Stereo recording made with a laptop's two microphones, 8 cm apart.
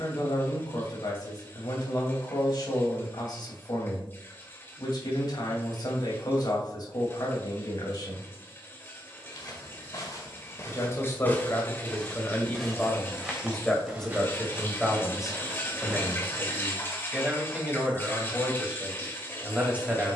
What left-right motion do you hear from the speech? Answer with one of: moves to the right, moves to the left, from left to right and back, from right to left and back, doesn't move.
moves to the right.